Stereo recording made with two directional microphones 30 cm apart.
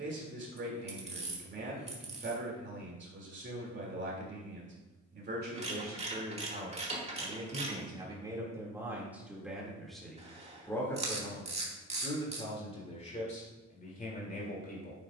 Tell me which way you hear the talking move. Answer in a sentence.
You can hear the talking go from the right side to the left.